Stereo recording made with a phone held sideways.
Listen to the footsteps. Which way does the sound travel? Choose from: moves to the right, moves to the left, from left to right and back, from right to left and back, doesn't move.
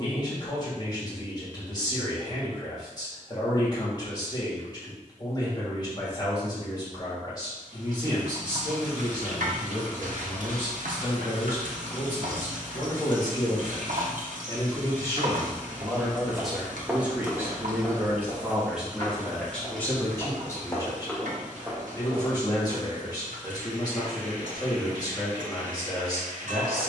from right to left and back.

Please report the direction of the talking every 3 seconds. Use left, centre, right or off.
left, left, left, left, left, centre, centre, left, left.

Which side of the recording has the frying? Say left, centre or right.
right.